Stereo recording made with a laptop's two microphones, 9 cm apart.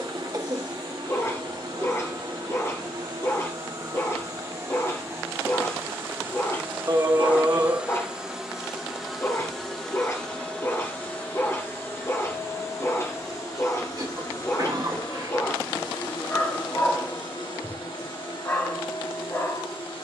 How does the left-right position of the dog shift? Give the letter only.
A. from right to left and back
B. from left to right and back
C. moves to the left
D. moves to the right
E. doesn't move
E.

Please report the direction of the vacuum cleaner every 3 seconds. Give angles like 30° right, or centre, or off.
50° right, 30° right, 10° right, 10° left, 30° left, 50° left, 60° left.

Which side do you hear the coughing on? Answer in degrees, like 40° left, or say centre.
40° right.